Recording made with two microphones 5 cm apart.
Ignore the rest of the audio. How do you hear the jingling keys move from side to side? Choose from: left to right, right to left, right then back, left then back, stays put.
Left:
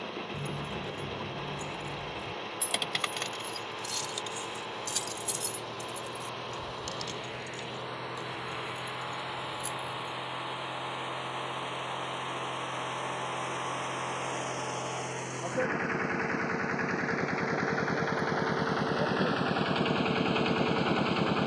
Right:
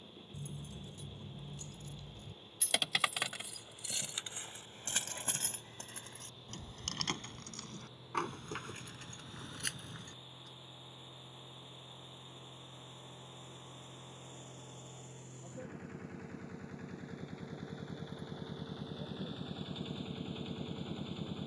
left to right.